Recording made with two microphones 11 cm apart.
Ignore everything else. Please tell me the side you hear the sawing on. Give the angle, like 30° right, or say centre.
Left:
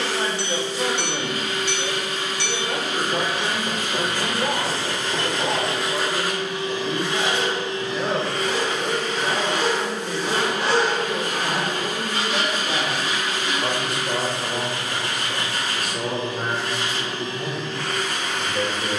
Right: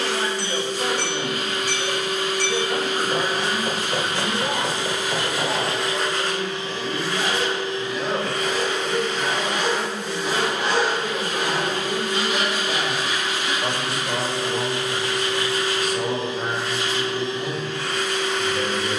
40° left.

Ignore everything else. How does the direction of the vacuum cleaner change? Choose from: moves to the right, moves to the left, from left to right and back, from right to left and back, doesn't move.
moves to the left.